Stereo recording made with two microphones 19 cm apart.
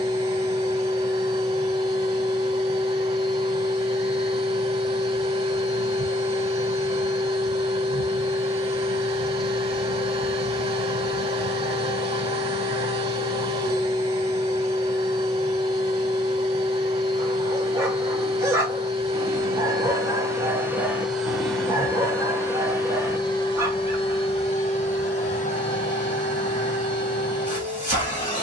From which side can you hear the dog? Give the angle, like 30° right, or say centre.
10° right.